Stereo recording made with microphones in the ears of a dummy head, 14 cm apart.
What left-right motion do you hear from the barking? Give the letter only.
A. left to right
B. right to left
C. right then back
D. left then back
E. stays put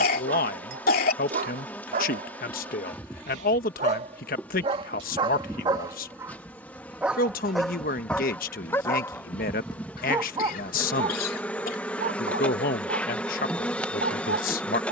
D.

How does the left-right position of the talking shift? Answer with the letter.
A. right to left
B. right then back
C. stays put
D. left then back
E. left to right
C.